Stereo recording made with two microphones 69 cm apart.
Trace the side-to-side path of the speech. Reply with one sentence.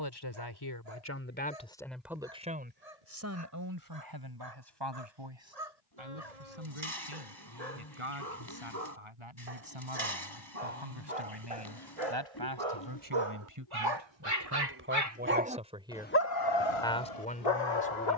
You can hear the speech go right and come back.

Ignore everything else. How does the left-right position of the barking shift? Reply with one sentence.
In this clip you hear the barking move to the left.